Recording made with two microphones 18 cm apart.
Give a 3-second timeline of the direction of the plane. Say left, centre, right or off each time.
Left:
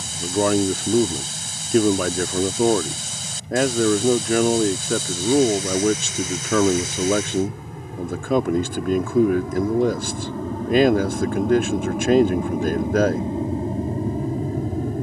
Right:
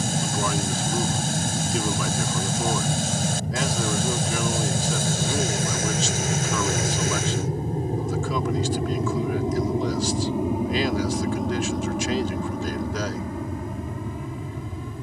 right, right, right, centre, left.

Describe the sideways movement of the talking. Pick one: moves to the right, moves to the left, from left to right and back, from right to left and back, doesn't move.
doesn't move.